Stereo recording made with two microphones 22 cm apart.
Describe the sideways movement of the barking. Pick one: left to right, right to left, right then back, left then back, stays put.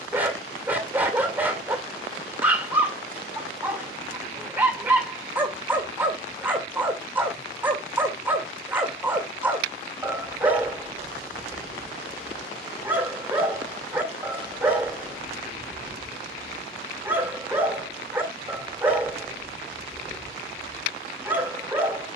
stays put.